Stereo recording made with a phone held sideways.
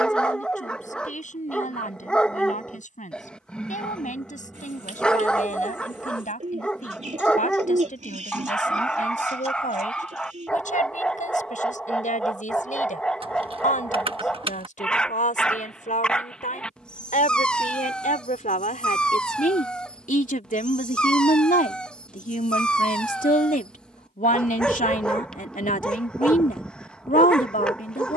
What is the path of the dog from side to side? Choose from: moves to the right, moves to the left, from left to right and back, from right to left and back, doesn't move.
doesn't move.